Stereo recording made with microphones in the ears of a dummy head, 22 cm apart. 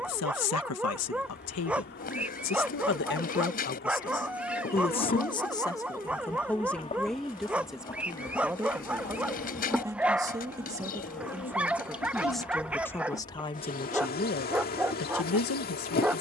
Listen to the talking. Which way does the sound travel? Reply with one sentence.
In this clip you hear the talking move from left to right and back again.